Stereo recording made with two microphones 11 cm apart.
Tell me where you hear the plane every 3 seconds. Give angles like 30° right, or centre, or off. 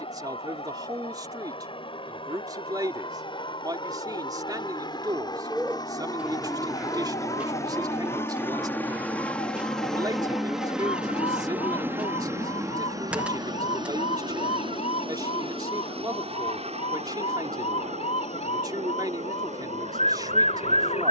60° left, 50° left, 30° left, centre, 30° right, 50° right, 70° right.